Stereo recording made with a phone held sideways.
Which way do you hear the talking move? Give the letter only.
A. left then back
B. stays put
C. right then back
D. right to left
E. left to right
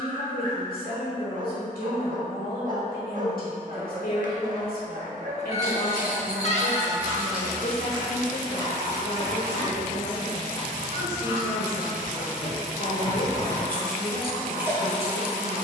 B.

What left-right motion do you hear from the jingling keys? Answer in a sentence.
In this clip you hear the jingling keys go left and come back.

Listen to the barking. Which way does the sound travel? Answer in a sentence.
You can hear the barking stay put.